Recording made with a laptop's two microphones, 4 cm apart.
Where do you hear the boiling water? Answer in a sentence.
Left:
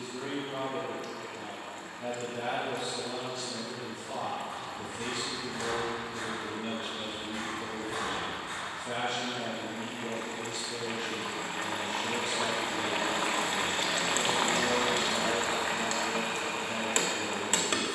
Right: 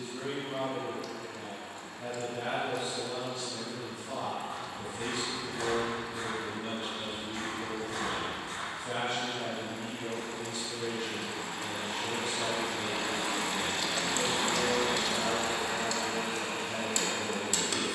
You can hear the boiling water on the left.